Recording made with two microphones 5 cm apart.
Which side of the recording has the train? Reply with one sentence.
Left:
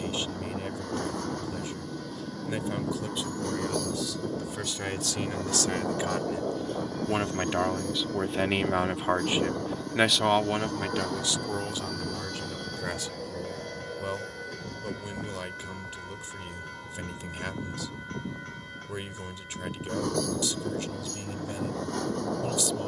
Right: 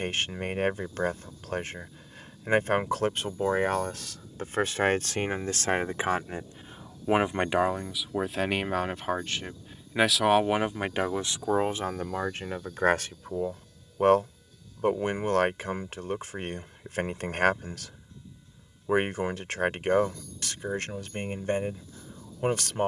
You can hear the train on the left.